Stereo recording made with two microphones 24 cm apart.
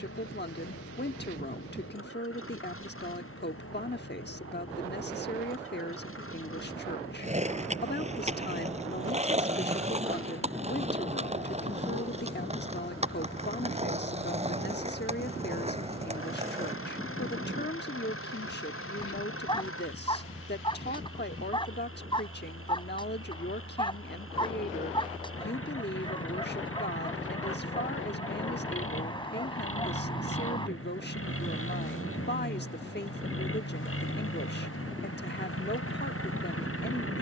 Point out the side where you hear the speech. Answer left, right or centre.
left.